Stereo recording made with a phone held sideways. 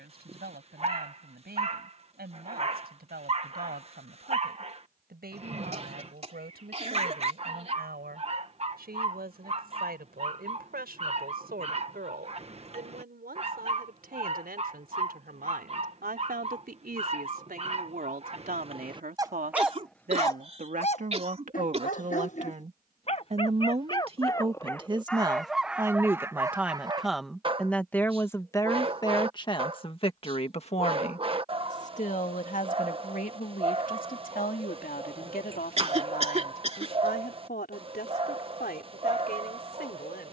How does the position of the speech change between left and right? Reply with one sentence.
In this clip you hear the speech go from the right side to the left.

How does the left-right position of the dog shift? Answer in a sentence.
You can hear the dog go left and come back.